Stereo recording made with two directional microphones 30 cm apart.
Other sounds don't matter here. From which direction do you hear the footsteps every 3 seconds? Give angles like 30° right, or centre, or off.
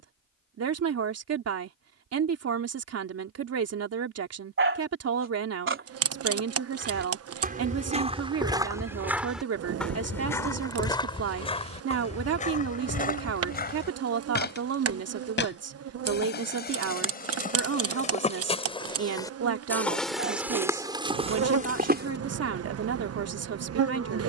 off, off, 20° right, 10° left, 30° left, 30° left, 10° left, 30° right.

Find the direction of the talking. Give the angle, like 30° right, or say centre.
50° right.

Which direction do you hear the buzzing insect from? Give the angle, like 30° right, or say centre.
50° right.